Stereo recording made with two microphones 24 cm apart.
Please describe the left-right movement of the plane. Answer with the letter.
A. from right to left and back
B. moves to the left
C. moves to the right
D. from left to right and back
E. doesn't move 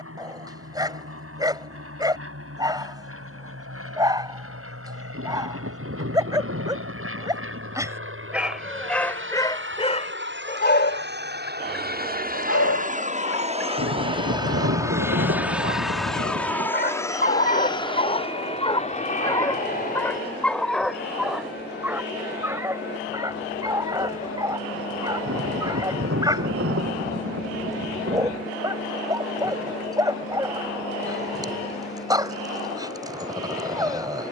B.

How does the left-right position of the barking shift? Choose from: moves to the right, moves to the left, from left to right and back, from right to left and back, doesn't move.
from right to left and back.